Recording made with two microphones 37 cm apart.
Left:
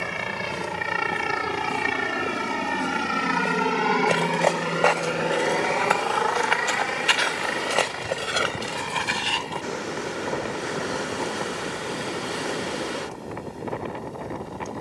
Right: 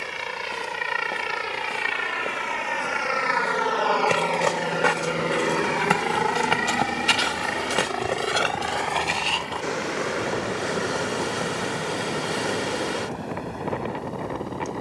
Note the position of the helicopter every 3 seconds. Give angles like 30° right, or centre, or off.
70° left, 20° left, 50° right, 70° right, 80° right.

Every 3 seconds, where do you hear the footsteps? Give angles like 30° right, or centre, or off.
20° left, 20° right, 30° right, 30° left, off.